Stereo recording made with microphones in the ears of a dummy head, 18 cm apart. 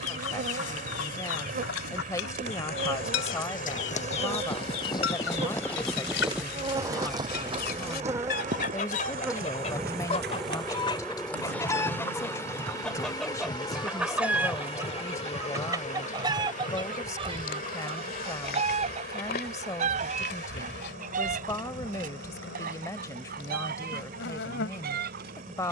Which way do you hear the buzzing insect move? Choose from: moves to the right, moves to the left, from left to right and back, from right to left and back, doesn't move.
moves to the left.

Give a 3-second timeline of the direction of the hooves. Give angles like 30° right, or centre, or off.
60° left, 30° left, 20° right, 50° right, 60° right, off, off, off, off.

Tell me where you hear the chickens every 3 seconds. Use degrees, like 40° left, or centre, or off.
80° left, 70° left, 50° left, 30° left, centre, 20° right, 40° right, 40° right, 50° right.